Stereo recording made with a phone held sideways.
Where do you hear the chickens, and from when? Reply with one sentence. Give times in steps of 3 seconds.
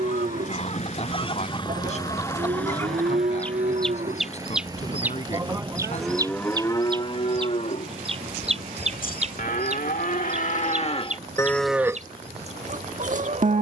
In this clip you hear the chickens on the left from 0 s, in the centre from 3 s and on the right from 6 s.